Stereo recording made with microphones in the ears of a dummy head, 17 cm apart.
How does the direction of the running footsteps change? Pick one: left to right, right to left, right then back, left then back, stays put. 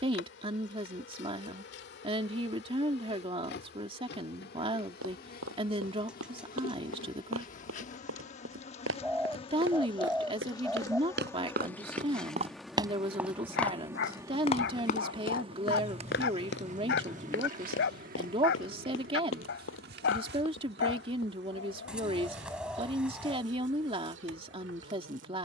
right to left.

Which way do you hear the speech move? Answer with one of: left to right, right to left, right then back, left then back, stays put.
stays put.